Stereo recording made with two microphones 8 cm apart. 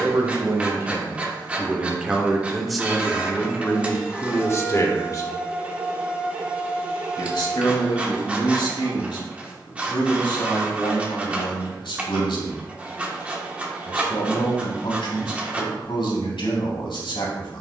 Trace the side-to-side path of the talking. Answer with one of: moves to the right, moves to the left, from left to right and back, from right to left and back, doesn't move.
moves to the left.